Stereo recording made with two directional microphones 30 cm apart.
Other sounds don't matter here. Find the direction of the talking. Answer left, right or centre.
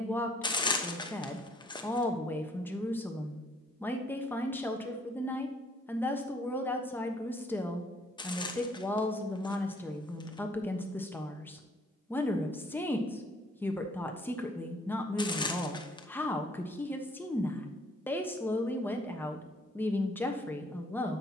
centre.